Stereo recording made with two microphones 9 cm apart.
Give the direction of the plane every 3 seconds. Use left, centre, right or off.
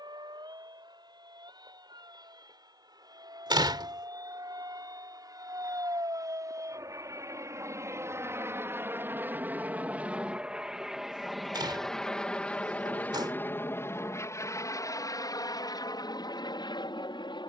right, right, right, centre, left, left.